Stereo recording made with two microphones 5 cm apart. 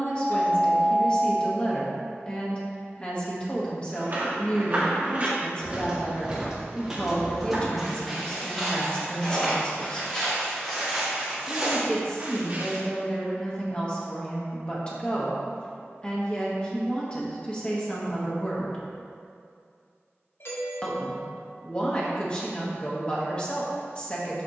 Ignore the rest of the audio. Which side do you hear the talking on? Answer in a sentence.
In this clip you hear the talking on the left.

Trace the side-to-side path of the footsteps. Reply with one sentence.
You can hear the footsteps move from right to left and back again.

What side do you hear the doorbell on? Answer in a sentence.
You can hear the doorbell on the left.